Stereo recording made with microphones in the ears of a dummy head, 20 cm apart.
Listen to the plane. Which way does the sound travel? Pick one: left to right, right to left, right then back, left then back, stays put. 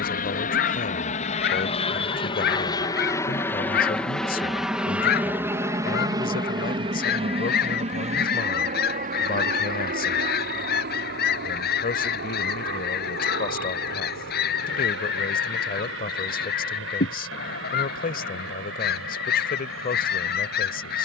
left to right.